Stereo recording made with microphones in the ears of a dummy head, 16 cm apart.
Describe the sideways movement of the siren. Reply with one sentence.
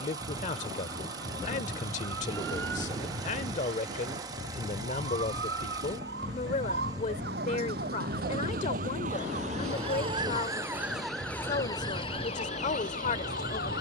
In this clip you hear the siren move from right to left.